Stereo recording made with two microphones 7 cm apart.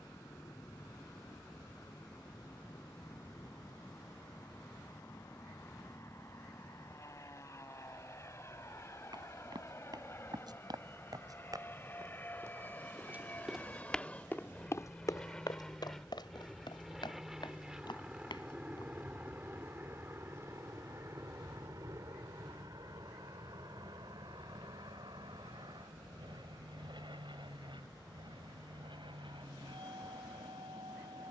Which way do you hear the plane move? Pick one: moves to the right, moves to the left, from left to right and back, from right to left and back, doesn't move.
moves to the right.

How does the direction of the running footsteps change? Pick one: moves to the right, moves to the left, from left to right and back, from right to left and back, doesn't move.
moves to the left.